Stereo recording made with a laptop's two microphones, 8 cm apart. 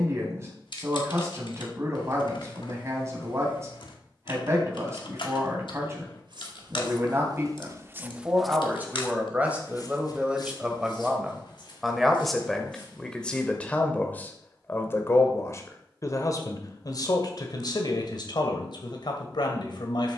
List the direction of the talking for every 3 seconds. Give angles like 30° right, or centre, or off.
30° right, 30° right, 30° right, 10° right, 10° left, 50° left, 60° left.